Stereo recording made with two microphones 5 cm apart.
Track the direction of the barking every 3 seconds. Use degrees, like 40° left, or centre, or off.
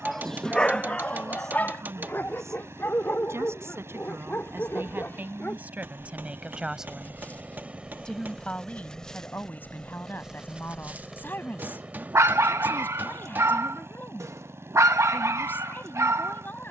30° left, 40° left, 30° left, 20° right, 60° right, 70° right.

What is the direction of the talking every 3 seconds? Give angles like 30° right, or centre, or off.
70° right, 40° right, centre, 40° left, 40° left, 40° left.